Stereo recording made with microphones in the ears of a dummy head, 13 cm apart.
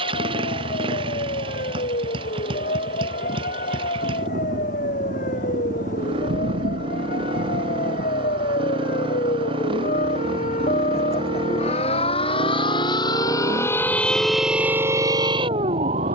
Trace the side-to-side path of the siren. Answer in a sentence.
You can hear the siren go from the left side to the right.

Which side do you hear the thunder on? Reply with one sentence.
In this clip you hear the thunder on the right.